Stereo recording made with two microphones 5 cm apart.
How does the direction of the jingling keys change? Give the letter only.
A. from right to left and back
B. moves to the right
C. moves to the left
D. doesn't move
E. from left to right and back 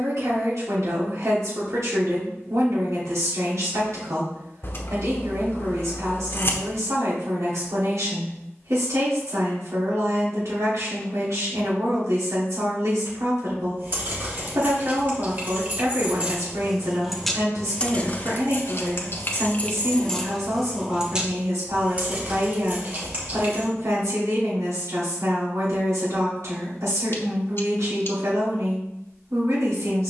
A.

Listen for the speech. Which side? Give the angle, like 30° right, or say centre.
80° right.